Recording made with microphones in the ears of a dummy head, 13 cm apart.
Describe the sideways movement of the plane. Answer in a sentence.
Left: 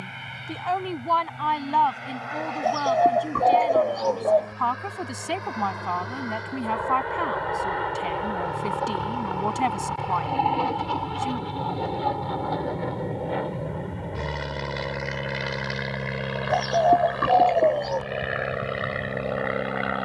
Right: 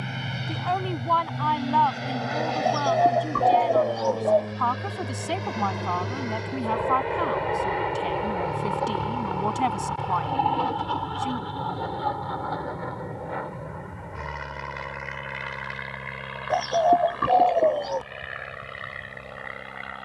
You can hear the plane go from the right side to the left.